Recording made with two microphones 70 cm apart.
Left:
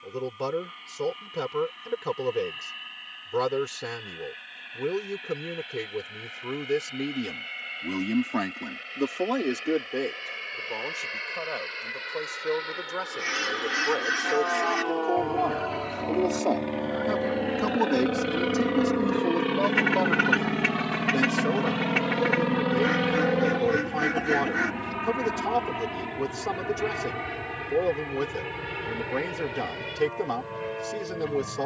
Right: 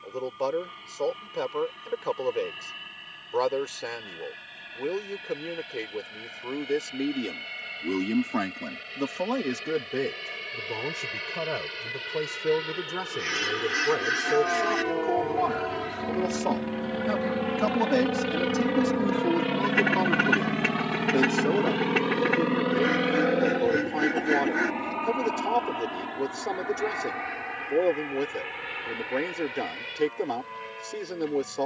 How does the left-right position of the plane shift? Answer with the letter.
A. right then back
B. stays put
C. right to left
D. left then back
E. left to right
C.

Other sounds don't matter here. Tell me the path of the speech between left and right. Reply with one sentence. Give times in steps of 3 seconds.
In this clip you hear the speech on the left from 0 s, on the right from 9 s, in the centre from 18 s and on the left from 21 s.